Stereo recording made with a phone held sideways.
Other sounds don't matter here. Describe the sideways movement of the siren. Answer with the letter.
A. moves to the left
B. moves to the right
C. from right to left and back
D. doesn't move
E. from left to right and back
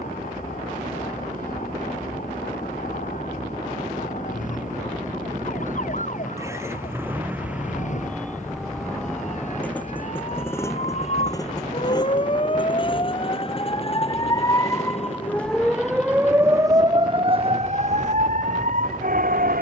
B.